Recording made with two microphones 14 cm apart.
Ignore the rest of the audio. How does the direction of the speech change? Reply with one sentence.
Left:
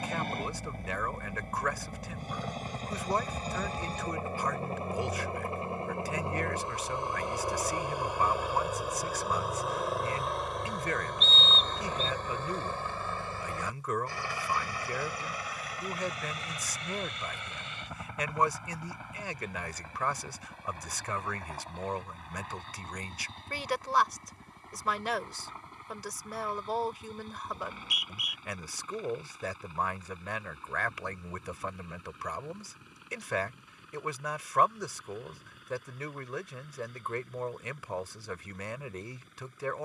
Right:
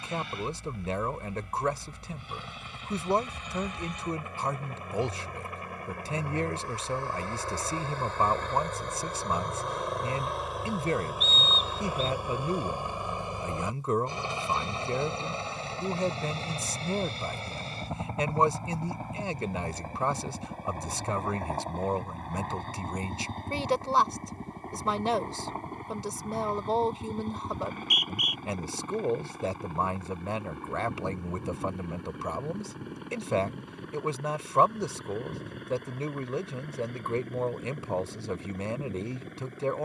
You can hear the speech stay put.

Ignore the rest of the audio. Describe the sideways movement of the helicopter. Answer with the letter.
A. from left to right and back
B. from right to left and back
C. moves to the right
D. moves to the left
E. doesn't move
C.